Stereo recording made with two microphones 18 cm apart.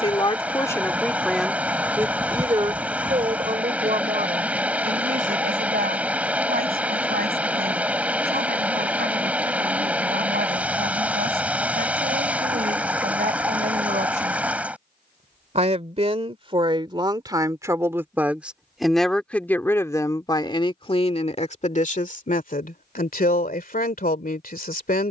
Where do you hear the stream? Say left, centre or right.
centre.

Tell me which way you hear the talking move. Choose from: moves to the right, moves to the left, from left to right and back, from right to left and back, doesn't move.
from left to right and back.